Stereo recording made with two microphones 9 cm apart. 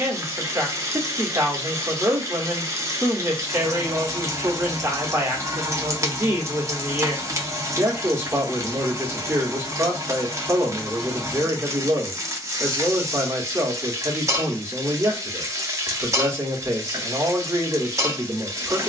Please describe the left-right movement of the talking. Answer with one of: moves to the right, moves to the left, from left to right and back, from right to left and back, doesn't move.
doesn't move.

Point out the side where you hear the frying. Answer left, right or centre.
right.